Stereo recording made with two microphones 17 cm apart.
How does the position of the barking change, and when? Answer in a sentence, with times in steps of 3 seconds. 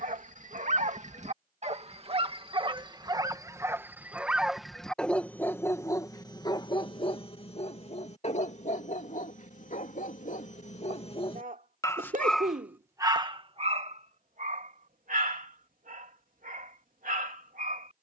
You can hear the barking on the right from 0 s, in the centre from 3 s, on the left from 6 s and on the right from 12 s.